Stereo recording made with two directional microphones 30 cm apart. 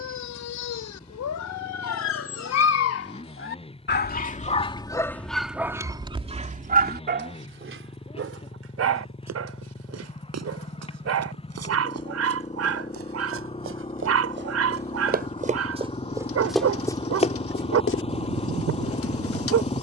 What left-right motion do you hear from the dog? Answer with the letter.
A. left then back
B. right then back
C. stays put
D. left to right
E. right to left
D.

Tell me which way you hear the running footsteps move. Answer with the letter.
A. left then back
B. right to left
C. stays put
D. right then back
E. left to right
B.